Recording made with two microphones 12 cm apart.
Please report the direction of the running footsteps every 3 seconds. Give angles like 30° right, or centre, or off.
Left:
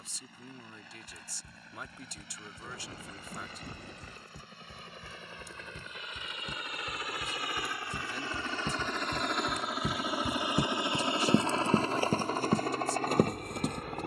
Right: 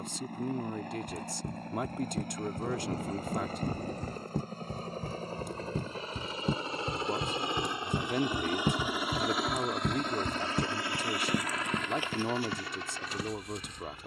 70° right, 60° right, 40° right, 10° left, 50° left.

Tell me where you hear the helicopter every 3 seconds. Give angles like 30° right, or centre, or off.
50° right, 40° right, 20° right, 10° left, 50° left.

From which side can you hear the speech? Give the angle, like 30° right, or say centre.
60° right.